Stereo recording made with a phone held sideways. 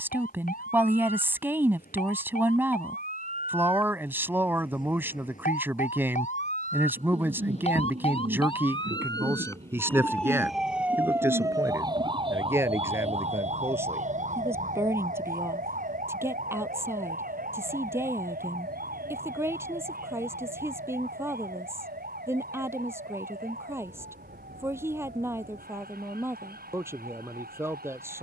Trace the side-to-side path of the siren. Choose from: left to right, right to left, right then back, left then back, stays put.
left to right.